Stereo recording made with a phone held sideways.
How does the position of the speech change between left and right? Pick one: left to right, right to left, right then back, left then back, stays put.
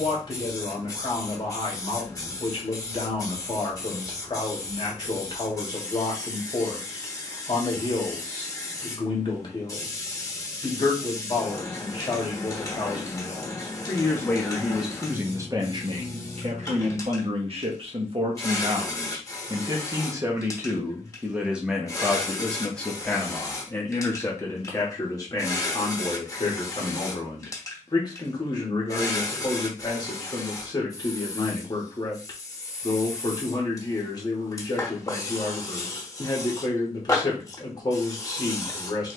right then back.